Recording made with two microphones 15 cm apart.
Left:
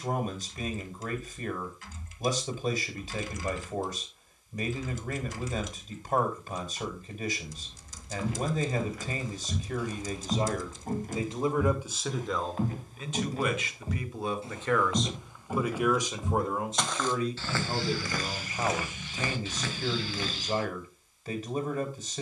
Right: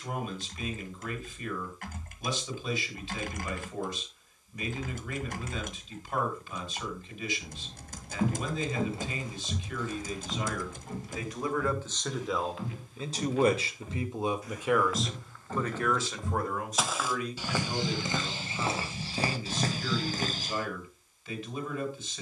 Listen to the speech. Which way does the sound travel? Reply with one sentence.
In this clip you hear the speech go right and come back.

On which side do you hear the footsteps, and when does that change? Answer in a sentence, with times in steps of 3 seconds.
In this clip you hear the footsteps not at all from 0 s, on the right from 6 s, on the left from 9 s, in the centre from 15 s, on the right from 18 s and not at all from 21 s.